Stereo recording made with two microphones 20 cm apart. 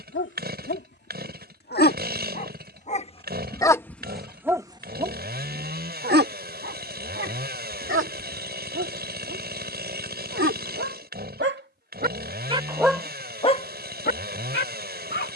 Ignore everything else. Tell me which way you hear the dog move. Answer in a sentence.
You can hear the dog move from left to right and back again.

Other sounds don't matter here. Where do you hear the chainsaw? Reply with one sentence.
You can hear the chainsaw on the right.